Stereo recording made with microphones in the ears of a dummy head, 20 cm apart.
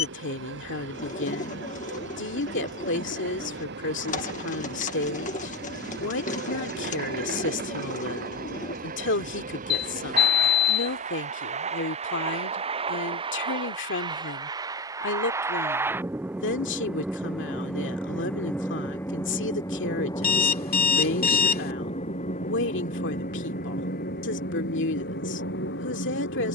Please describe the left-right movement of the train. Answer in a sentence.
You can hear the train go from the right side to the left.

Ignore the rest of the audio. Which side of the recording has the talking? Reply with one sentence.
In this clip you hear the talking on the left.